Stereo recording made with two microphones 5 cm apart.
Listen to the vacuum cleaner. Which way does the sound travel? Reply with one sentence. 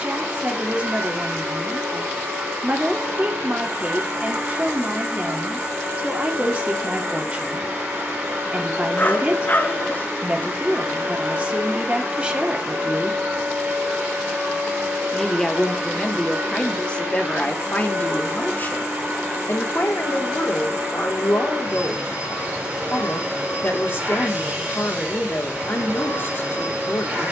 You can hear the vacuum cleaner stay put.